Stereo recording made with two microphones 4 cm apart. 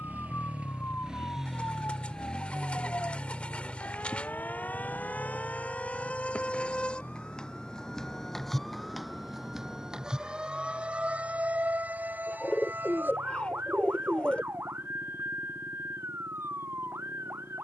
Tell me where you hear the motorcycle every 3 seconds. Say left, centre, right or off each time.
centre, left, left, left, left, left.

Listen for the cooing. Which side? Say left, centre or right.
left.